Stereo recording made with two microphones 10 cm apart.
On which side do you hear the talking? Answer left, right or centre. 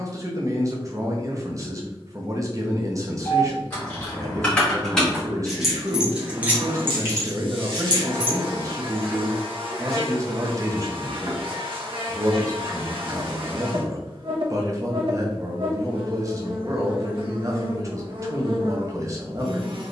right.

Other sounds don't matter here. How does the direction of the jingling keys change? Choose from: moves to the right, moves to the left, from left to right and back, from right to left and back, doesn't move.
moves to the right.